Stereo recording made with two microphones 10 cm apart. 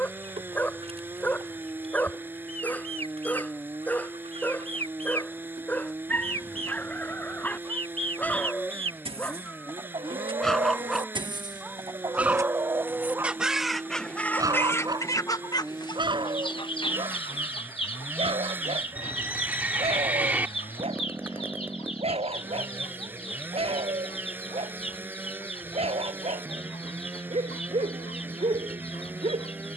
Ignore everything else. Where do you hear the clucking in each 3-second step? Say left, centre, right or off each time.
right, right, right, right, centre, left, left, left, left, left.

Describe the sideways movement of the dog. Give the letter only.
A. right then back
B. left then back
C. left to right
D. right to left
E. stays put
C.